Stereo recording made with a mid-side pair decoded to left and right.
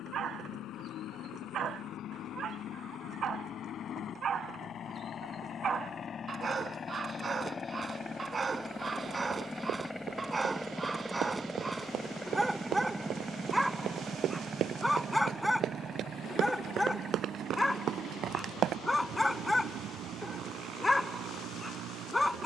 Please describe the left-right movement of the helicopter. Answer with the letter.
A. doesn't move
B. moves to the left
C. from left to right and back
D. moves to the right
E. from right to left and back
D.